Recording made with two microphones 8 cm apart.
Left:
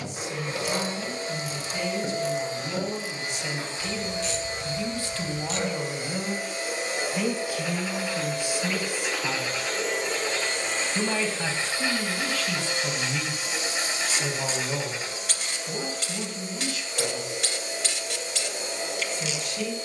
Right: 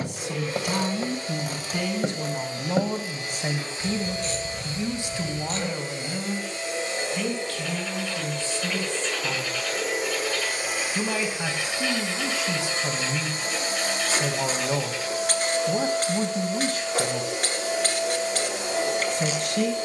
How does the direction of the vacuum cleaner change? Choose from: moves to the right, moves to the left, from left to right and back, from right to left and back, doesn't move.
moves to the right.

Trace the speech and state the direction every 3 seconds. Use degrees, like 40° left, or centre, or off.
60° right, 30° right, 10° left, centre, 20° right, 40° right, 60° right.